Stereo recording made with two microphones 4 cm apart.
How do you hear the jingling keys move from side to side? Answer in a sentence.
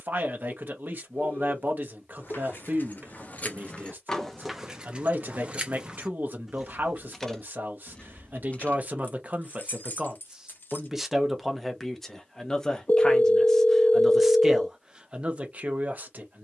You can hear the jingling keys go right and come back.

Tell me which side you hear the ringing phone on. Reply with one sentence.
In this clip you hear the ringing phone on the left.